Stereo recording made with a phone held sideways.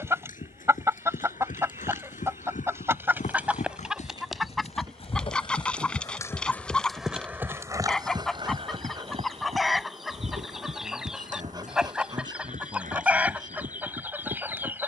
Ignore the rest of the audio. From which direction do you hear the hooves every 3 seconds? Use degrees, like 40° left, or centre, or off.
70° left, 50° left, 10° right, 60° right, 70° right.